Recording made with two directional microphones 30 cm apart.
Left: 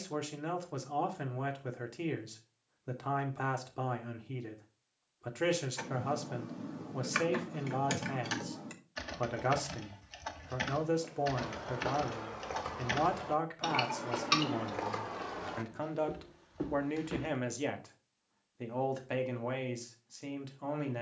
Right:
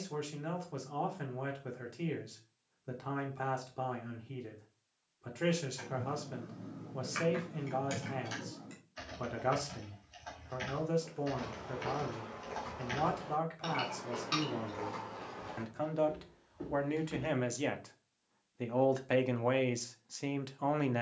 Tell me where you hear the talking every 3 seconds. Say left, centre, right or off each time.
left, left, left, left, left, centre, right.